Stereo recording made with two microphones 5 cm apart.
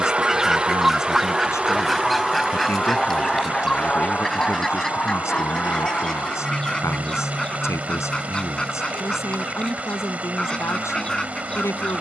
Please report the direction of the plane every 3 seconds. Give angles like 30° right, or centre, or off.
centre, 20° left, 40° left, 50° left.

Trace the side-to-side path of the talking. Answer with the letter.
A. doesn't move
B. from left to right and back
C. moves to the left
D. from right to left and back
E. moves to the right
A.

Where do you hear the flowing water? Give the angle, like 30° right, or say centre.
30° right.